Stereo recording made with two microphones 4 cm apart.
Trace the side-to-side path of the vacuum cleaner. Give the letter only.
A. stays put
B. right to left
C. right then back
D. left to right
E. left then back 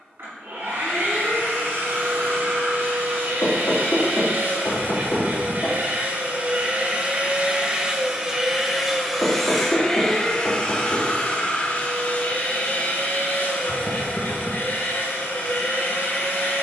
B.